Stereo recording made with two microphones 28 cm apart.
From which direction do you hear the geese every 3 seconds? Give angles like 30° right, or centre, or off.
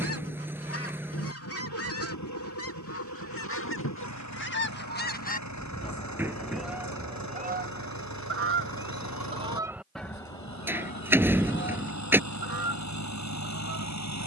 50° left, 40° left, 20° right, 10° left, 50° left.